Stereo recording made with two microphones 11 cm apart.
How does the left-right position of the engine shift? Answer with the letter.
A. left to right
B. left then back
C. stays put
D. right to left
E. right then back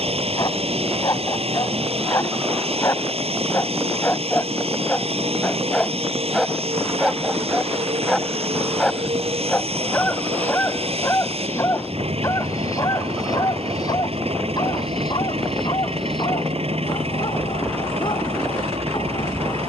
C.